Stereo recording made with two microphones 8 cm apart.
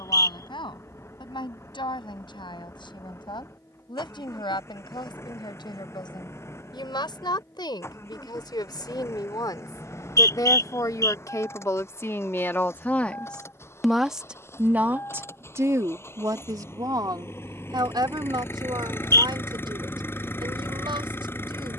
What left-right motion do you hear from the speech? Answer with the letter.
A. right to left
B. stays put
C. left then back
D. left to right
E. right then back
D.